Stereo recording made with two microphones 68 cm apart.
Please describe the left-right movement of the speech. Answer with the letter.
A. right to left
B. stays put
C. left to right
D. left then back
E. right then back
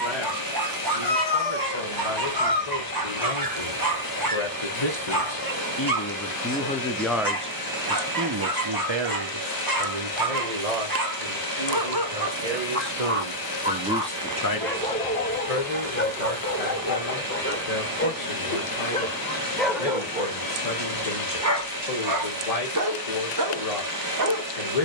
E.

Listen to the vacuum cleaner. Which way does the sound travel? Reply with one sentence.
You can hear the vacuum cleaner stay in one place.